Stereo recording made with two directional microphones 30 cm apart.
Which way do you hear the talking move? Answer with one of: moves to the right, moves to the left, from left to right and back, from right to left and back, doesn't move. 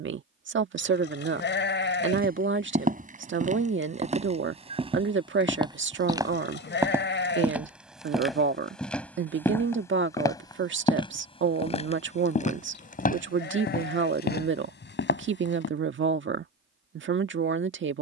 doesn't move.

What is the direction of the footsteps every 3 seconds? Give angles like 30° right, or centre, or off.
30° right, 20° right, centre, 10° left, 30° left, 40° left.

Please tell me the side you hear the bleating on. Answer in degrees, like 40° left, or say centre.
40° left.